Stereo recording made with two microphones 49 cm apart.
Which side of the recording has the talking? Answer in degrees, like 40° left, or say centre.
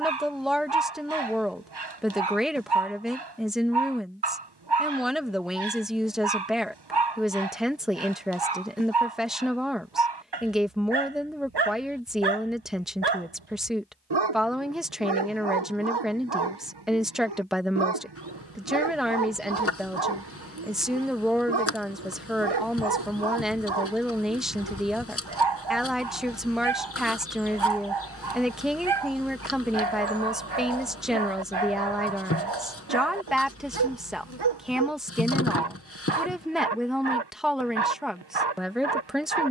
centre.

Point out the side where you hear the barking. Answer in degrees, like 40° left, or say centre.
50° right.